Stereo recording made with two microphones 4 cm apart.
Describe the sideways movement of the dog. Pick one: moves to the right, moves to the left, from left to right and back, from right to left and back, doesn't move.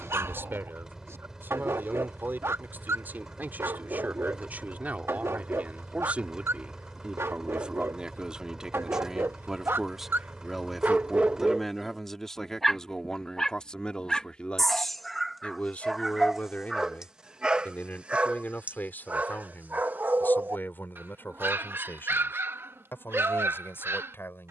from right to left and back.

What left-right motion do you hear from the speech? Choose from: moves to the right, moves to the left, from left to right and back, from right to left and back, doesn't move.
moves to the left.